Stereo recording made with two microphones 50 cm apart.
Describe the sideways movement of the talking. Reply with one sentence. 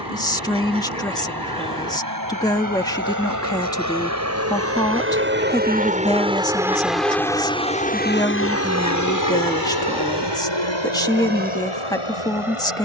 You can hear the talking stay in one place.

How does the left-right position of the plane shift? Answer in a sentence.
In this clip you hear the plane go from the right side to the left.